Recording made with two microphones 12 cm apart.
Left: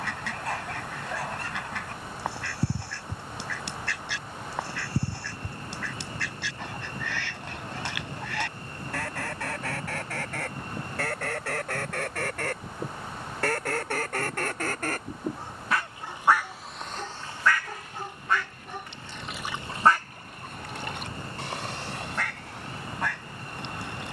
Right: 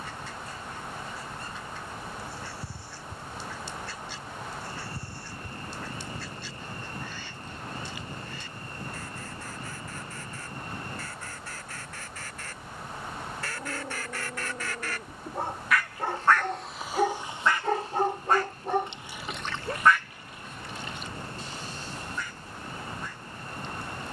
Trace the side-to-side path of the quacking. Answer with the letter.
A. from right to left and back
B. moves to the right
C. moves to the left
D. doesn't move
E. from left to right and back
E.